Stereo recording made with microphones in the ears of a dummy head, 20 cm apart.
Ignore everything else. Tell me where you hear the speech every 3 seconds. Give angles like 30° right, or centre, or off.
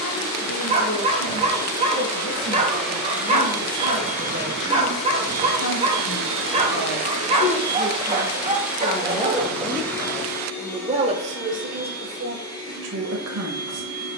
60° left, 50° left, 30° left, 20° right, 50° right.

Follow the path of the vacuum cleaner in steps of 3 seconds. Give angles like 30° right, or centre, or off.
10° left, 40° right, 30° right, 10° left, 20° left.